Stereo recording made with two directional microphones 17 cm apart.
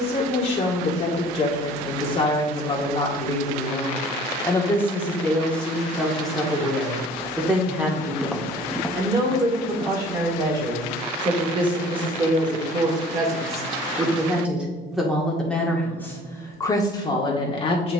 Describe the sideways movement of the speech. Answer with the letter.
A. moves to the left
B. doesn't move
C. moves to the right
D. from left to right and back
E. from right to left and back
D.